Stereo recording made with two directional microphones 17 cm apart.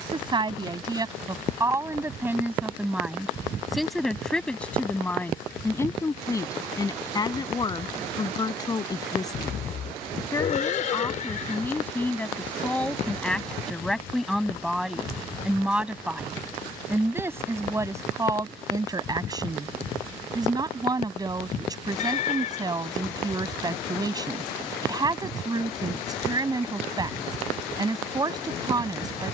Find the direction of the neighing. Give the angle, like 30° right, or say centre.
50° left.